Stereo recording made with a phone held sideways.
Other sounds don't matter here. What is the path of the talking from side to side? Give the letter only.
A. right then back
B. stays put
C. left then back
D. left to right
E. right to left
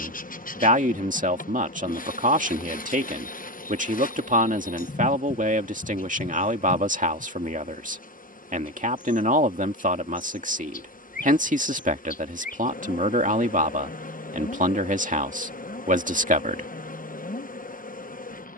B.